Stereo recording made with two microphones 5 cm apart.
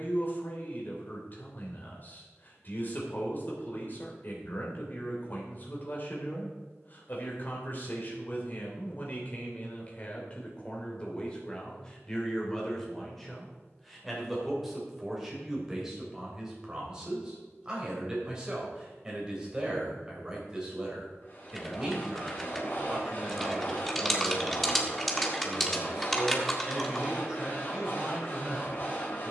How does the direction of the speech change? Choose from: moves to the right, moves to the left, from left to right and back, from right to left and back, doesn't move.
moves to the right.